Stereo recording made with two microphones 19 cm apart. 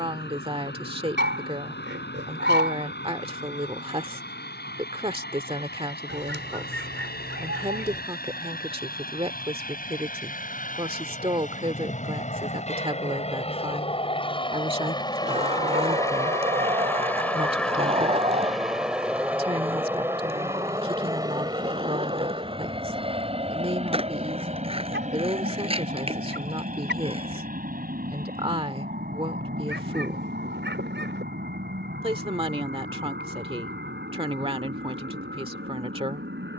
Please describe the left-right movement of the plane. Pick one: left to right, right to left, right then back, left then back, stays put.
left to right.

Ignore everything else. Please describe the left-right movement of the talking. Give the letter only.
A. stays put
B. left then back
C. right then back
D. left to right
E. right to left
A.